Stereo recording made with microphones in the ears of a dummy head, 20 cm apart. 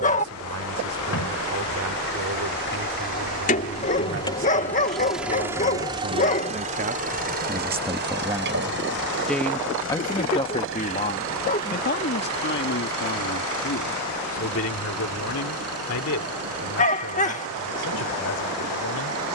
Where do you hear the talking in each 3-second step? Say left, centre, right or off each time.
right, right, right, left, left, left, left.